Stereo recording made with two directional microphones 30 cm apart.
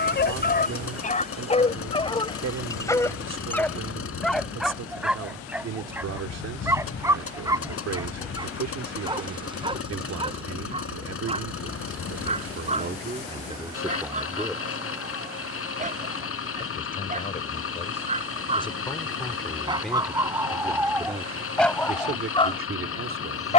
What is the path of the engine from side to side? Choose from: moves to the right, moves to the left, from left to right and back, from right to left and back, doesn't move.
doesn't move.